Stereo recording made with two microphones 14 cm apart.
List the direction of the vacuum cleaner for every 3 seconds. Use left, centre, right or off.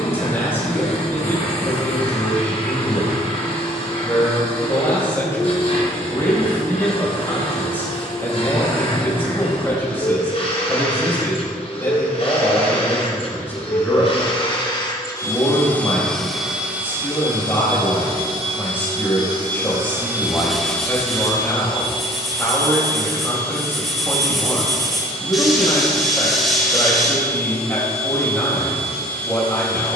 left, left, left, left, left, centre, right, left, left, left.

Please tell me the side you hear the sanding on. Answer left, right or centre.
centre.